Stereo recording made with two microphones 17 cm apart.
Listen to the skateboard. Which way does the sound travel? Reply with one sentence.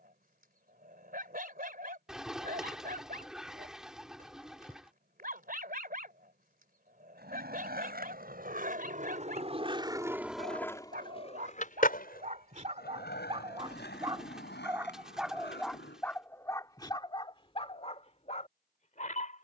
In this clip you hear the skateboard travel towards the left.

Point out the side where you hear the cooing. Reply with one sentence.
You can hear the cooing in the centre.